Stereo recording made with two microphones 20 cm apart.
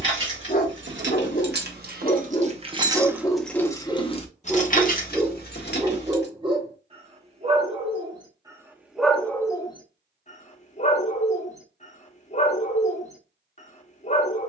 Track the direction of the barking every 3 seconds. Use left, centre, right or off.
left, centre, right, left, left.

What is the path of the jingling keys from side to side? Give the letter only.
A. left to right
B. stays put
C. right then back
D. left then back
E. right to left
E.